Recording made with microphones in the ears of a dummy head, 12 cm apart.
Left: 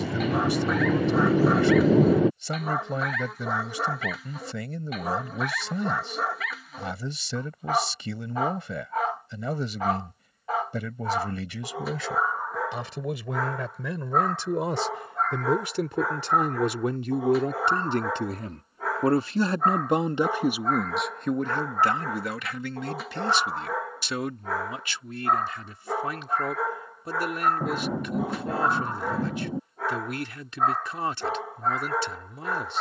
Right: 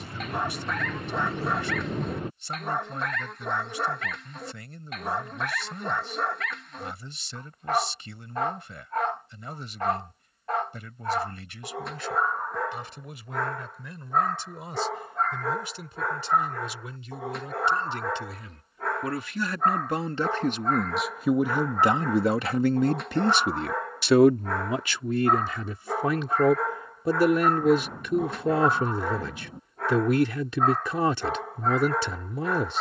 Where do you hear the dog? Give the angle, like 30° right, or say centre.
centre.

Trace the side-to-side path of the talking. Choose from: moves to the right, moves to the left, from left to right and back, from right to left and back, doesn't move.
moves to the right.